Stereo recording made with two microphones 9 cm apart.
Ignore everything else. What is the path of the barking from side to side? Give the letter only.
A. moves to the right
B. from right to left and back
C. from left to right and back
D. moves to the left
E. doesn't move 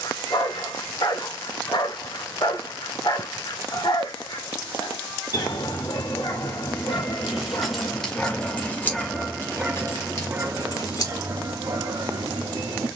A.